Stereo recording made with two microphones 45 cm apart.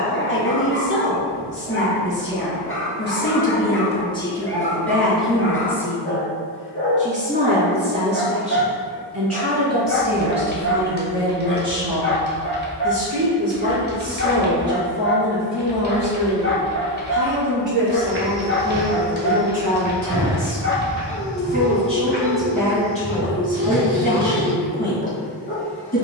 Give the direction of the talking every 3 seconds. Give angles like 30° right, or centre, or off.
30° left, 10° left, 20° right, 40° right, 50° right, 50° right, 50° right, centre, 20° left.